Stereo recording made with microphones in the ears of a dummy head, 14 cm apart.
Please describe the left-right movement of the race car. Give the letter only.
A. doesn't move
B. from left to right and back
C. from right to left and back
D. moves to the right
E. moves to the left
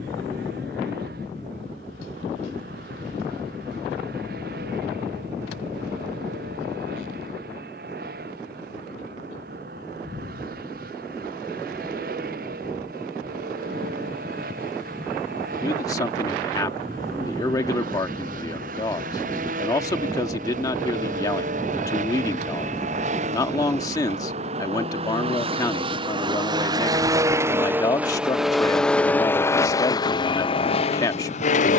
E.